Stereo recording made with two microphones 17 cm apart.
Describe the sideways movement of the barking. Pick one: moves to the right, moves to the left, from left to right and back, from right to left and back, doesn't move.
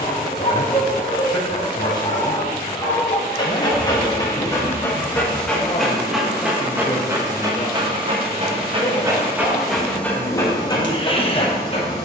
from left to right and back.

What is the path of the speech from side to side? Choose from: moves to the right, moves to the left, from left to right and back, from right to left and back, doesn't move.
doesn't move.